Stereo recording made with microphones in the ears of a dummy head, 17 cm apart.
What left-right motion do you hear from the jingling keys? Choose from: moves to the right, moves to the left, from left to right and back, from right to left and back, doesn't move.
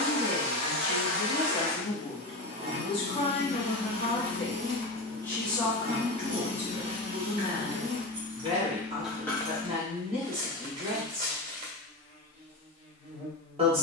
from left to right and back.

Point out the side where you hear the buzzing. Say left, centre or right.
right.